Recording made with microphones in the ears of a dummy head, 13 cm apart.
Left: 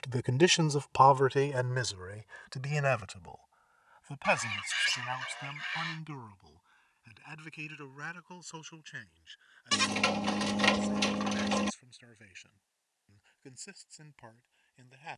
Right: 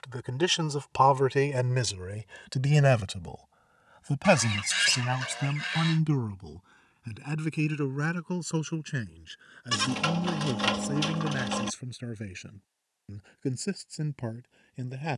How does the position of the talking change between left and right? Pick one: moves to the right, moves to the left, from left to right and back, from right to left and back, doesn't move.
moves to the right.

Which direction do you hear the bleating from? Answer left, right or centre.
centre.